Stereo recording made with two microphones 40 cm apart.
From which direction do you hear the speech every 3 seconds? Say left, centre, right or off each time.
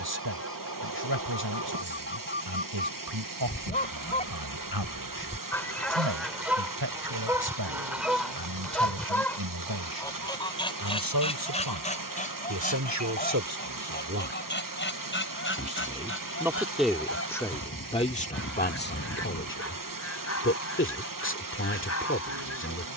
right, right, right, right, right, centre, left, left.